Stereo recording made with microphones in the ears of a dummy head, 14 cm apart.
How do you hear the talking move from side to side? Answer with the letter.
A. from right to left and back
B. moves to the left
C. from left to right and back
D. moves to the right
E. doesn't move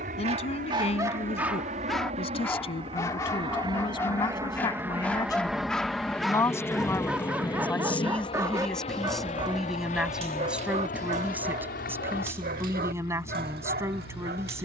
D.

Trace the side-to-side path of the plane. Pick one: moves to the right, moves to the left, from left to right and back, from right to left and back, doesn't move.
moves to the left.